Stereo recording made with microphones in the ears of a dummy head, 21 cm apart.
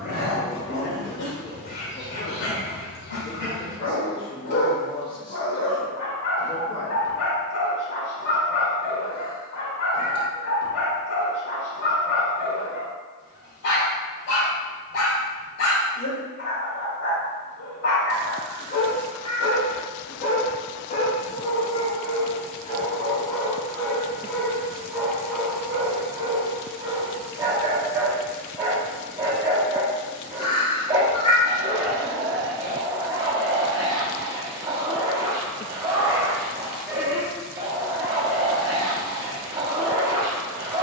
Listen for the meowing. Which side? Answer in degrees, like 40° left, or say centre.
20° left.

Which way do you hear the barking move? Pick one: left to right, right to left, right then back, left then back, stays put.
left to right.